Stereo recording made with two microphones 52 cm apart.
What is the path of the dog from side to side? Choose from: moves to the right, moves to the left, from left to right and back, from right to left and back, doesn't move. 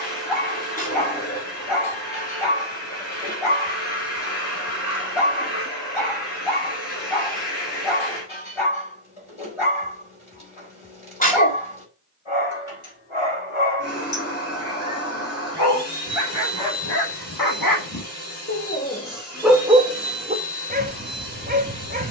moves to the right.